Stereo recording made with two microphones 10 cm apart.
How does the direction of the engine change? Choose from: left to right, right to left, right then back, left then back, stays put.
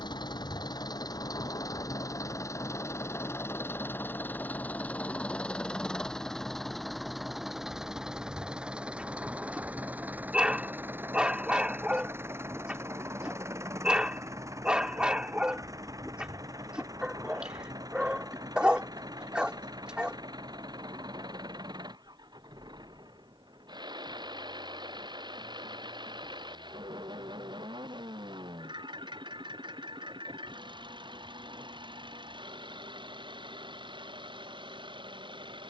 left to right.